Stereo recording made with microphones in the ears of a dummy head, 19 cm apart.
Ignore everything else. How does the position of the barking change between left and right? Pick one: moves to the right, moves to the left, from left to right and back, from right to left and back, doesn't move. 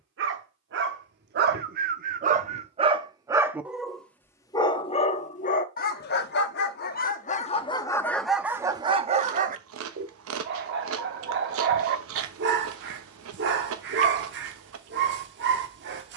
from right to left and back.